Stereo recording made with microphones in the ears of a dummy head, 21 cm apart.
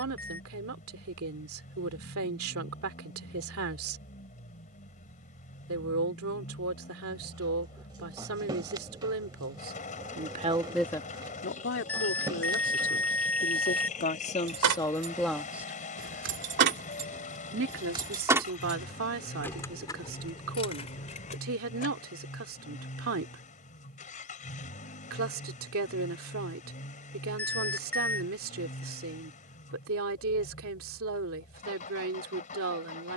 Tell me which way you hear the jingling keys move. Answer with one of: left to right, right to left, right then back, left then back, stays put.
right to left.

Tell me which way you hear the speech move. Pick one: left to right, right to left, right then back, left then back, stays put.
left then back.